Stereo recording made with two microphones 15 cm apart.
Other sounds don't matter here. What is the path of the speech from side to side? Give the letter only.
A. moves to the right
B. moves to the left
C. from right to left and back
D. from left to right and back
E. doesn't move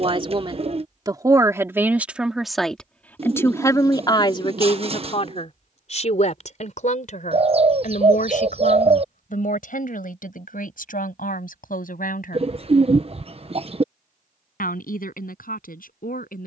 B.